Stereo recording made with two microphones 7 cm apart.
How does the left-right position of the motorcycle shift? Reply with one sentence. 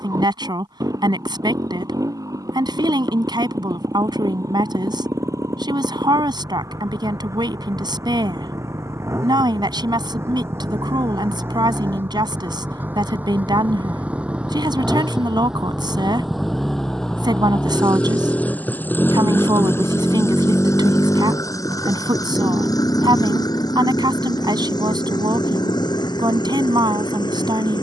You can hear the motorcycle travel towards the left.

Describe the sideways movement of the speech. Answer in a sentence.
In this clip you hear the speech stay in one place.